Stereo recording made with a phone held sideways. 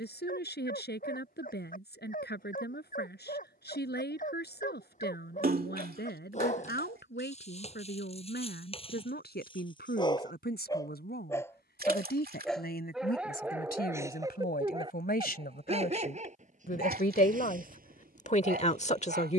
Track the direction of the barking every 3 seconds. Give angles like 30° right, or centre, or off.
50° left, 50° left, 40° left, 20° left, 10° right, 50° right, 60° right.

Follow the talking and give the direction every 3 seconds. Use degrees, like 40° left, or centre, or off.
80° left, 80° left, 80° left, 80° left, 70° left, 60° left, 40° left.